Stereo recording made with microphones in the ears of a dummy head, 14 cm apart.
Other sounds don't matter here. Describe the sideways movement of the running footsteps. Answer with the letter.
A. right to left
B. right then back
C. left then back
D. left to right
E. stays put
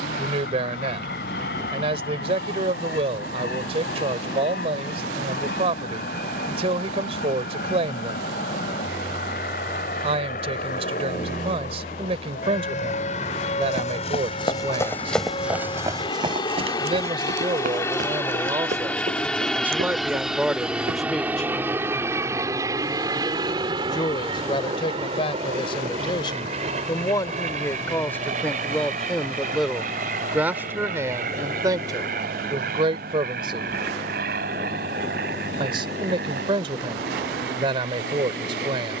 D.